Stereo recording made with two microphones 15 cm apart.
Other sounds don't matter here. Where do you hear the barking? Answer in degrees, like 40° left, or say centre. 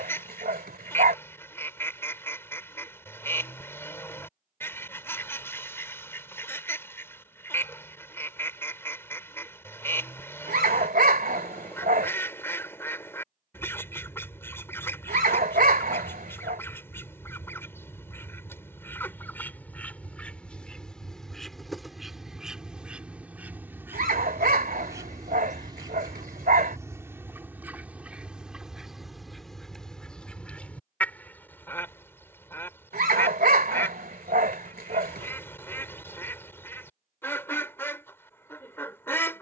80° right.